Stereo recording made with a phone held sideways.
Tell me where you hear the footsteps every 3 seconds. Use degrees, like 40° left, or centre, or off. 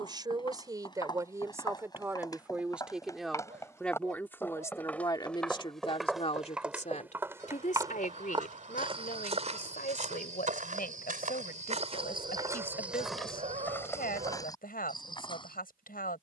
30° left, 10° left, 20° right, 60° right, centre, 30° left.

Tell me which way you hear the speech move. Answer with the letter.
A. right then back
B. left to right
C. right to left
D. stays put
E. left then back
C.